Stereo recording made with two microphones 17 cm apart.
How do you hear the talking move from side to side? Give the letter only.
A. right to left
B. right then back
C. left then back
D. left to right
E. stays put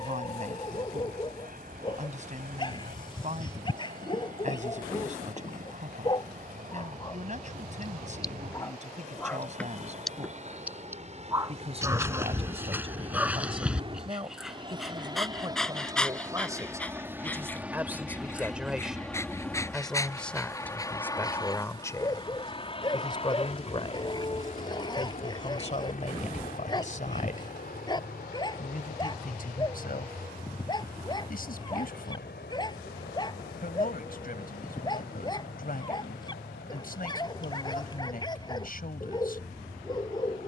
A.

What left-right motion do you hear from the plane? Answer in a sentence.
You can hear the plane move from right to left.